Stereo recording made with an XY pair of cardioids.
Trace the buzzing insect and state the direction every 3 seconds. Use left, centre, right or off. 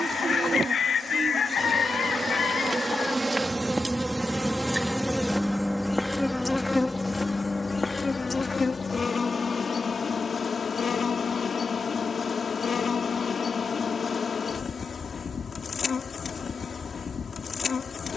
right, centre, left, left, left, left.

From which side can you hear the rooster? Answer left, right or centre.
left.